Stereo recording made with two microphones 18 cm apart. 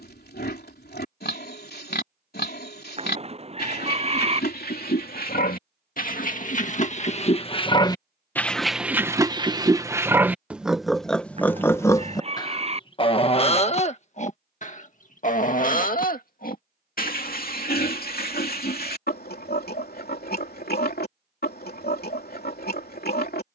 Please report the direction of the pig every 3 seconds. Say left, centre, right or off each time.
left, left, left, centre, left, left, left, left.